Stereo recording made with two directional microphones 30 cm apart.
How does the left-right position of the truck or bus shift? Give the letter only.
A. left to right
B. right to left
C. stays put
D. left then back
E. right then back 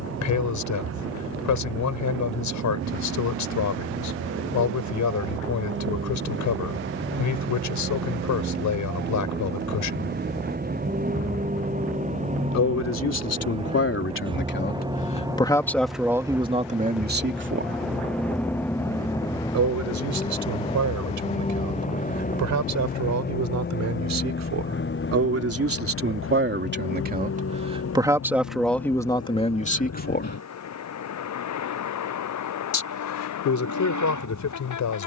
B.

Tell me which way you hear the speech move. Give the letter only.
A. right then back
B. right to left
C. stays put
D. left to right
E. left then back
A.